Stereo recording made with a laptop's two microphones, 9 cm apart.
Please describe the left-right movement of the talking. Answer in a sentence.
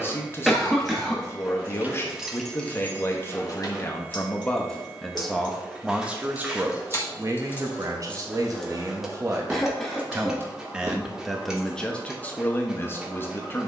You can hear the talking move from left to right and back again.